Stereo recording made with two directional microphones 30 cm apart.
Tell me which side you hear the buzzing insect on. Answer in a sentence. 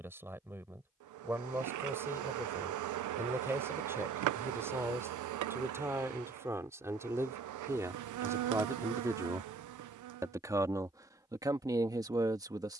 In this clip you hear the buzzing insect on the right.